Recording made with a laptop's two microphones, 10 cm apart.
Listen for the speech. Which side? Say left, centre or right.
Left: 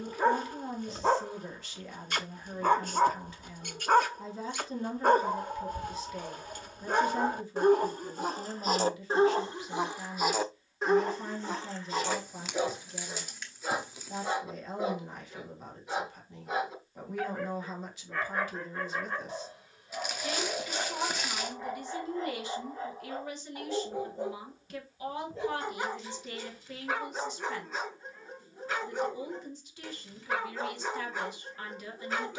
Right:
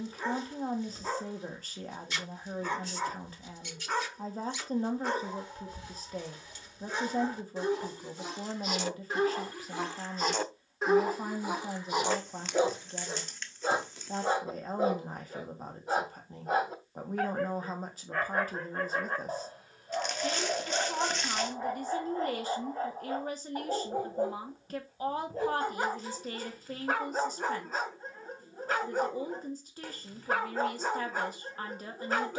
right.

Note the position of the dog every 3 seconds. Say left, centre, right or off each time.
left, left, left, centre, right, right, right, right, right, right, right.